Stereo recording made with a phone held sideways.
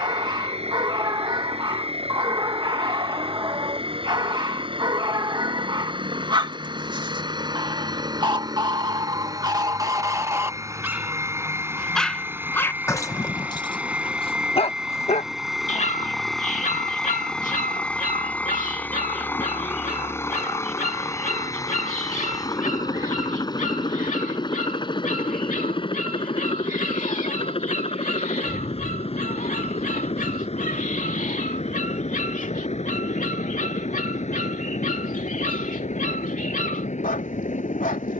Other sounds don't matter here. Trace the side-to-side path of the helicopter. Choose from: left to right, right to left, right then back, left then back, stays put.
right to left.